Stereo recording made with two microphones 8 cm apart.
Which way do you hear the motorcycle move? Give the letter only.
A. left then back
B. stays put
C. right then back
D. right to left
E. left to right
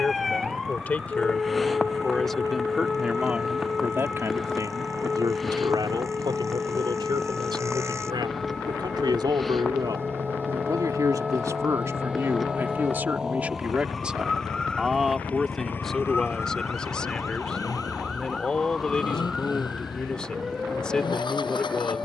D.